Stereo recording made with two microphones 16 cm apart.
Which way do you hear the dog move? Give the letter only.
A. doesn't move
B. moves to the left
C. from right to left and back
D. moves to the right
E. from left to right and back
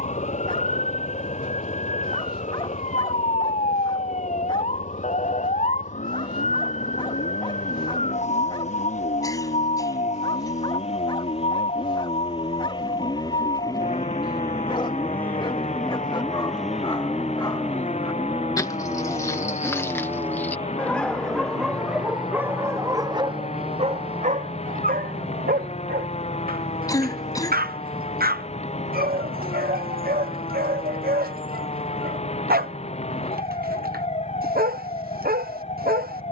D.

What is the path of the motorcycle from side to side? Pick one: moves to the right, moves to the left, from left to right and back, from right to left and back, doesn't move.
moves to the right.